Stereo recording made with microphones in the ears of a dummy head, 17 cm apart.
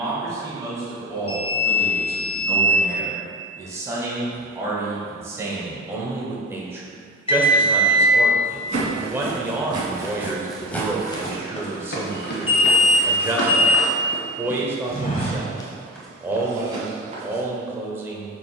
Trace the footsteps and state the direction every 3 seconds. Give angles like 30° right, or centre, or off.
off, off, 40° right, centre, 70° left, centre.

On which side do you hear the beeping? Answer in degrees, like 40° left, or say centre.
30° left.